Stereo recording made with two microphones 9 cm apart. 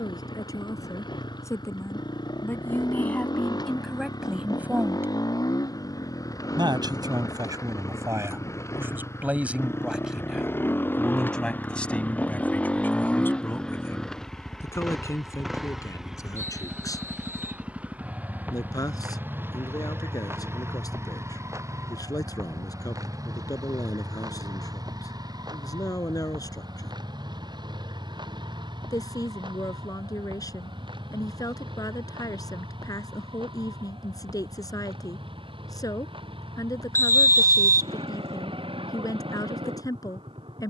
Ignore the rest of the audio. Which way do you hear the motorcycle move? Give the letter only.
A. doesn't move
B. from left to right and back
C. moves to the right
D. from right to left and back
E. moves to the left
C.